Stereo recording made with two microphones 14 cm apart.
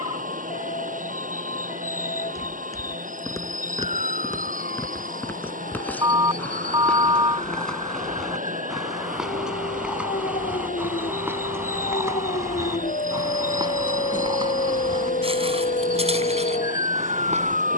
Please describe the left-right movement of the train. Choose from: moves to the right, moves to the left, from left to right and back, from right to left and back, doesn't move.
doesn't move.